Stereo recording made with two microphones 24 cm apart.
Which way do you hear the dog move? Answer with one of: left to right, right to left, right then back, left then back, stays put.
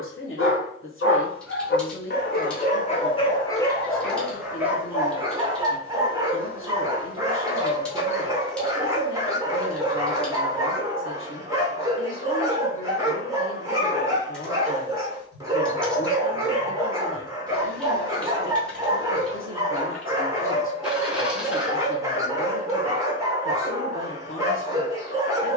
left to right.